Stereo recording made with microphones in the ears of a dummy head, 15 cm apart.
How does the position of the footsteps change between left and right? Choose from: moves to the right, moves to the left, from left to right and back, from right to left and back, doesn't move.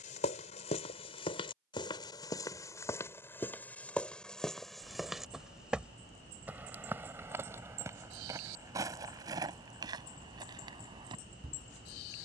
moves to the right.